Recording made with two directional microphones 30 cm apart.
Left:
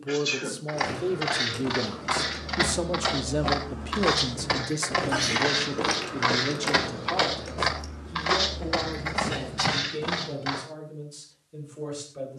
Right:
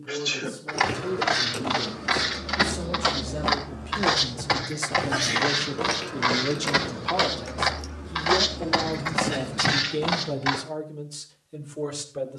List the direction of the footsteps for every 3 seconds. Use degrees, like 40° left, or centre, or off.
30° right, 10° right, centre, 30° right.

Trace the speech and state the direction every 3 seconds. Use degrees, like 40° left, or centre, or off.
60° left, 20° left, 20° right, 50° right.